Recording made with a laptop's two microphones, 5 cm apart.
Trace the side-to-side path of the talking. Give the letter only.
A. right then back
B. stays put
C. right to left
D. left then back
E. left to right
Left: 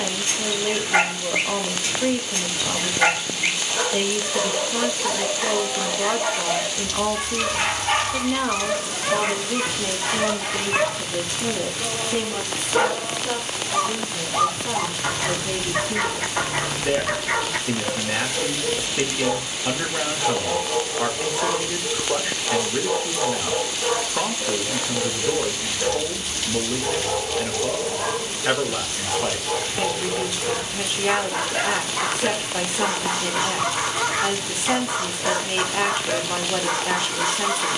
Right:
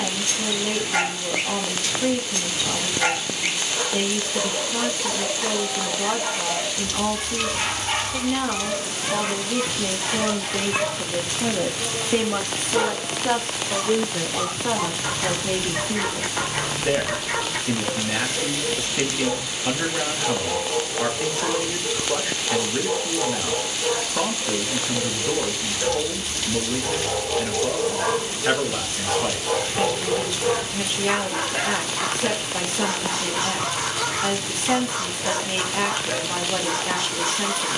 A.